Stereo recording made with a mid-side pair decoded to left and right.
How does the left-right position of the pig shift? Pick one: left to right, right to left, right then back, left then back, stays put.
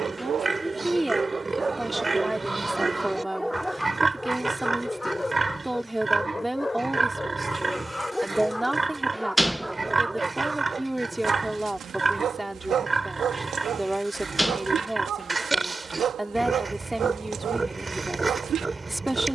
stays put.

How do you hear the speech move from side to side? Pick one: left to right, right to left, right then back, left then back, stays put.
stays put.